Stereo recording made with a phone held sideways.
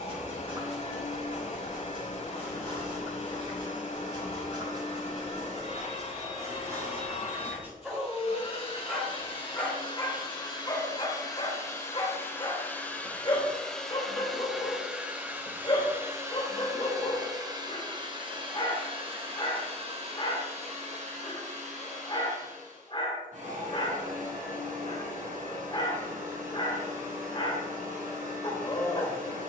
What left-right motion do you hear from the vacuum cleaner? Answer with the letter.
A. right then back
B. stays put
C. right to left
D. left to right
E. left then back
D.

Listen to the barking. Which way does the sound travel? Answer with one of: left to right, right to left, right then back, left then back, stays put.
right to left.